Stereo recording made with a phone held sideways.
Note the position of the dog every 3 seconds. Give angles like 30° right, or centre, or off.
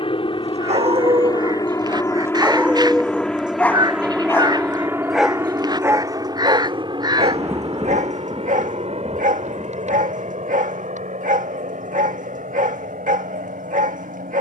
30° right, centre, 50° right, 60° right, 60° right.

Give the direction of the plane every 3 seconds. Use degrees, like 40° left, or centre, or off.
30° left, 10° right, 30° right, 50° right, 60° right.